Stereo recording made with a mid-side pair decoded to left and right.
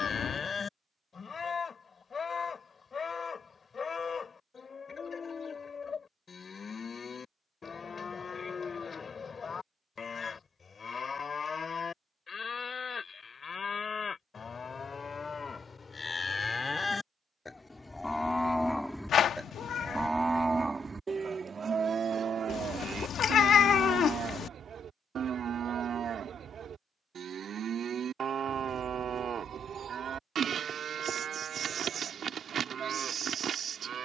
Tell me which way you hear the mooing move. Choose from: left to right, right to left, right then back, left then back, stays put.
left to right.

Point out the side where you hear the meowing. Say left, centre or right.
left.